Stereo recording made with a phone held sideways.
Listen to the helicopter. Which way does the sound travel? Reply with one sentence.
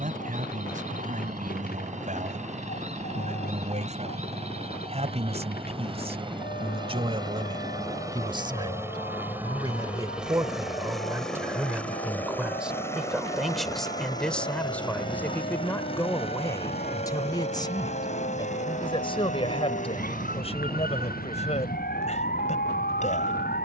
In this clip you hear the helicopter move to the left.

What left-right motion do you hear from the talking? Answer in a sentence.
You can hear the talking move from right to left.